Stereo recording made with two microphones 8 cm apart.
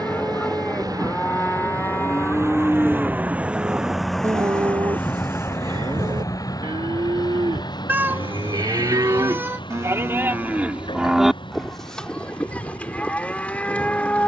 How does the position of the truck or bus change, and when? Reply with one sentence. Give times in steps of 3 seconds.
You can hear the truck or bus on the right from 0 s, in the centre from 3 s and on the left from 6 s.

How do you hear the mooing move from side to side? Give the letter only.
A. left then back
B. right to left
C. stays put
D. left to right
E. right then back
E.